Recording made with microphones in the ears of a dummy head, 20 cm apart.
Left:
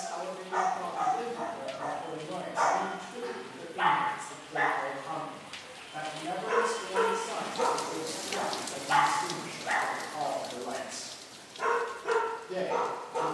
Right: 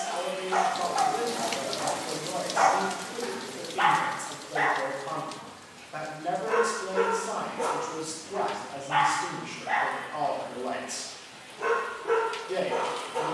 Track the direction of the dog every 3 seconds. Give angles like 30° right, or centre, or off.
30° right, 10° right, 40° left, 60° left, 70° left.